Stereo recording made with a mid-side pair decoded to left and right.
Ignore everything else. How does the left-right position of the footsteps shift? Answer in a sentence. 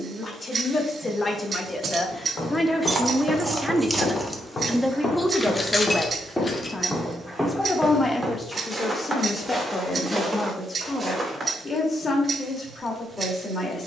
In this clip you hear the footsteps move from left to right.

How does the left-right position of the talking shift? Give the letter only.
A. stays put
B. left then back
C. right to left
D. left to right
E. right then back
E.